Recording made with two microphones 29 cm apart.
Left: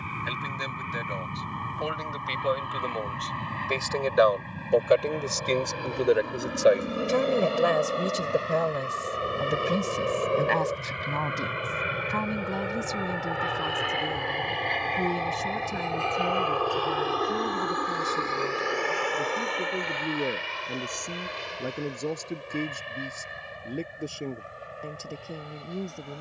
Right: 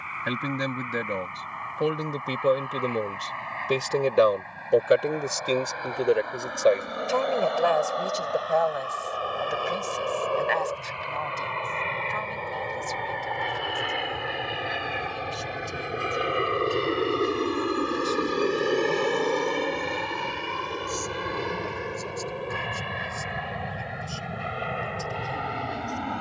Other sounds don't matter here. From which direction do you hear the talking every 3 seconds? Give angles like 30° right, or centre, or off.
60° right, 30° right, 20° left, 50° left, 60° left, 60° left, 70° left, 70° left, 70° left.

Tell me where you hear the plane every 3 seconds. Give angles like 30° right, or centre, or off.
50° left, 40° left, 40° left, 20° left, centre, 20° right, 50° right, 60° right, 70° right.